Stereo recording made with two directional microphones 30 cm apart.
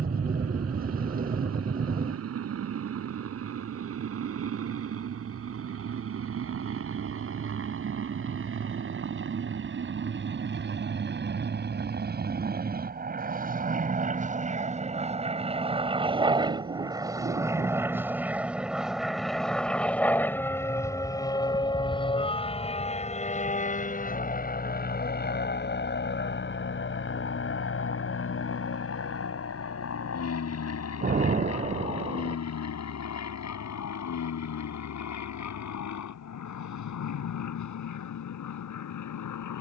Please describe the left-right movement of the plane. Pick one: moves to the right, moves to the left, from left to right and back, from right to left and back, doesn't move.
moves to the left.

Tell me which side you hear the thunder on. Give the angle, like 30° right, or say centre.
30° right.